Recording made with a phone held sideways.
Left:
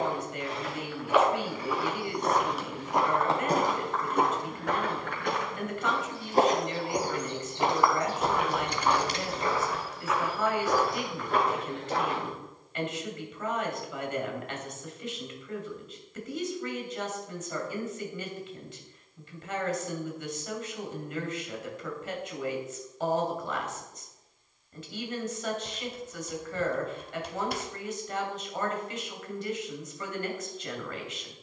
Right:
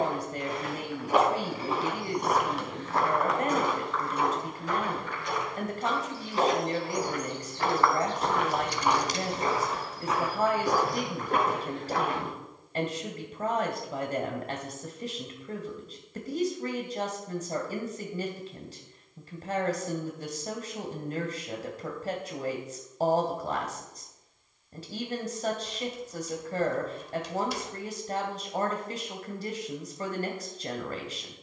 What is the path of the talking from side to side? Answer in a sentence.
You can hear the talking stay put.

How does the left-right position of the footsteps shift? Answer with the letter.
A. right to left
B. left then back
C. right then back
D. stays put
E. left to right
B.